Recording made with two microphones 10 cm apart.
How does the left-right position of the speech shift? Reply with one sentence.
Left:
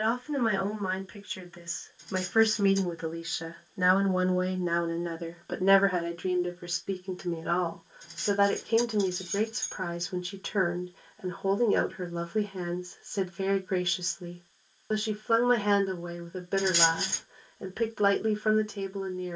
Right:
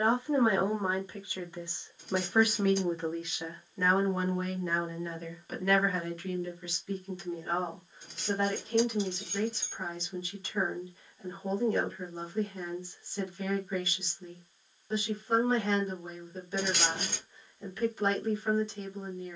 In this clip you hear the speech move to the left.